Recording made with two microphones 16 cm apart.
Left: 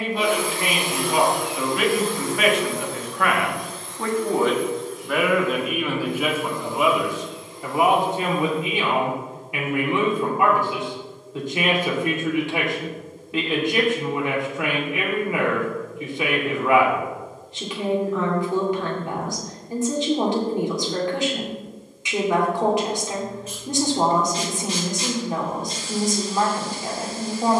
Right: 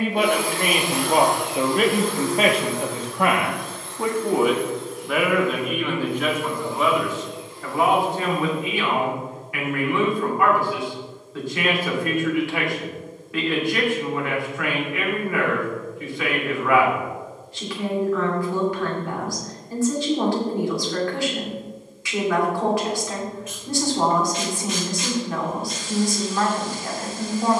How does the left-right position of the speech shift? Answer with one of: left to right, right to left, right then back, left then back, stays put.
right to left.